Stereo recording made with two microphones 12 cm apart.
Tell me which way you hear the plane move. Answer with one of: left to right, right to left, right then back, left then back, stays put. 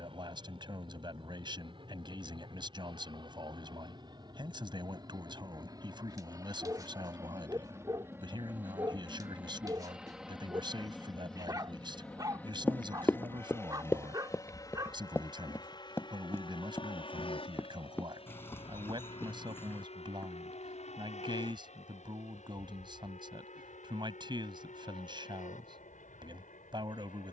right to left.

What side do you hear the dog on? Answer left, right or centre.
right.